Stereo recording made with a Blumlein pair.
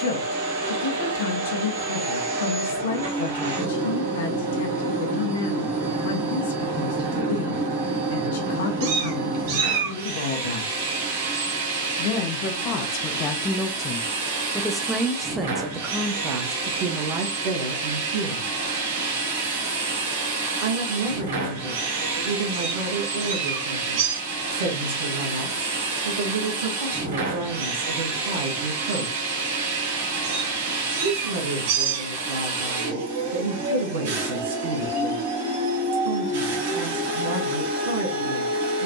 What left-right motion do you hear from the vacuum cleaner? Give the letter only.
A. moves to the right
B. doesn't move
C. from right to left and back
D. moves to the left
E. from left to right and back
B.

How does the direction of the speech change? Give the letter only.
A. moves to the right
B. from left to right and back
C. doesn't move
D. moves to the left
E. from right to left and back
A.